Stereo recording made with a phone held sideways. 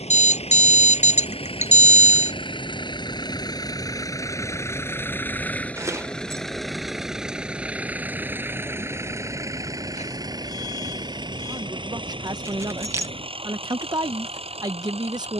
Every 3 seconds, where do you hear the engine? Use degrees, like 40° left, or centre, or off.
50° left, 20° left, 10° right, 30° right, 40° right.